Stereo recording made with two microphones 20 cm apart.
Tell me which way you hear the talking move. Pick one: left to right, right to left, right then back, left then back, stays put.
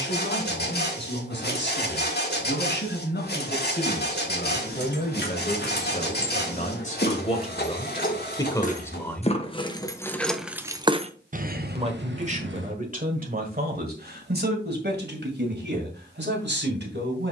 left to right.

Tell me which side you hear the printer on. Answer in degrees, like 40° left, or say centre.
60° left.